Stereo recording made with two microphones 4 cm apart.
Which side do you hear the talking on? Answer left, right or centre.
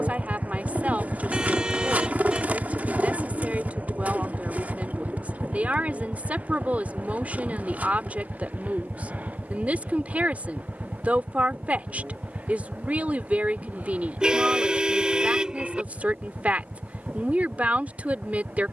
right.